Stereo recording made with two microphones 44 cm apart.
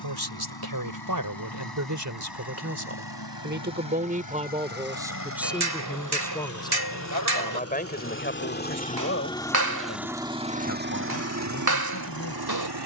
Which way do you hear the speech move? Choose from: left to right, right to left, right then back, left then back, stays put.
right to left.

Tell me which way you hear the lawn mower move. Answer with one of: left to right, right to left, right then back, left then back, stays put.
left to right.